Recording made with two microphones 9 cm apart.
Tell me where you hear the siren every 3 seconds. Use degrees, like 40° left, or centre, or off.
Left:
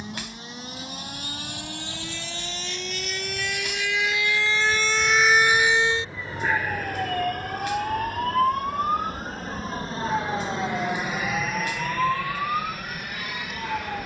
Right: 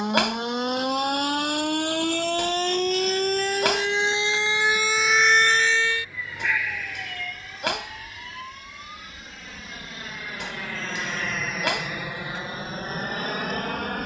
60° right, 20° right, 50° left, 70° left, 80° left.